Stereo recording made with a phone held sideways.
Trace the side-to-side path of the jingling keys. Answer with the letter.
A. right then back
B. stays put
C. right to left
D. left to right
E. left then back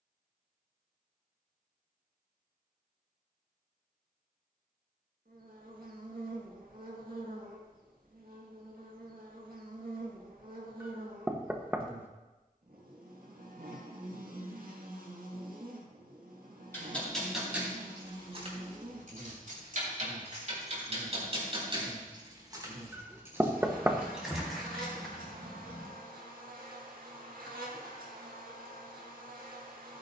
A.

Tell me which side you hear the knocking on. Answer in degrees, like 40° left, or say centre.
10° right.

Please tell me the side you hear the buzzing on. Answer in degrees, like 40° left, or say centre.
70° right.